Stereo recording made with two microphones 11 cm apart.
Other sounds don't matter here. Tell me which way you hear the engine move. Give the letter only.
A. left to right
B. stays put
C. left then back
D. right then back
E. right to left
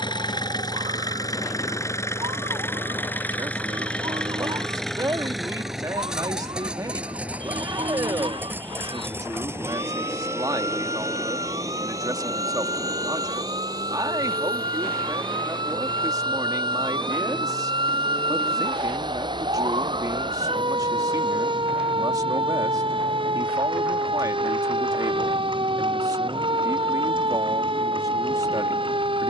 A.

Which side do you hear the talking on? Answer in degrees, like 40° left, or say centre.
30° right.